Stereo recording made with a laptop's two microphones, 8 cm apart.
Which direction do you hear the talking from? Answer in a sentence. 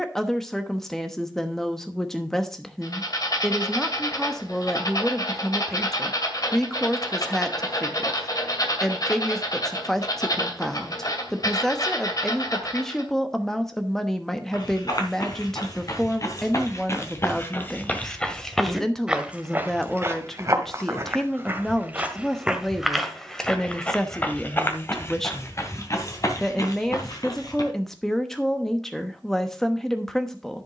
In this clip you hear the talking in the centre.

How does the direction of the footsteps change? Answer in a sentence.
In this clip you hear the footsteps move from left to right and back again.